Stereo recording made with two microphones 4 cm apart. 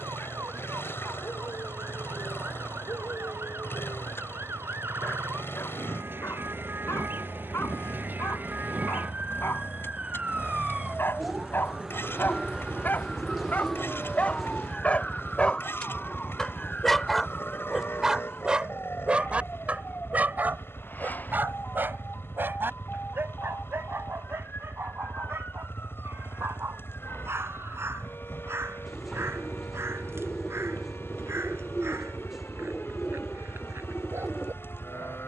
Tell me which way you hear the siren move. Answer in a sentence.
In this clip you hear the siren go from the right side to the left.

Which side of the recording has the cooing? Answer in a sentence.
In this clip you hear the cooing in the centre.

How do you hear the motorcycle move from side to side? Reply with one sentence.
In this clip you hear the motorcycle stay put.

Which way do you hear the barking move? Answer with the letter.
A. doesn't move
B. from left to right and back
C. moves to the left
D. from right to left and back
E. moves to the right
E.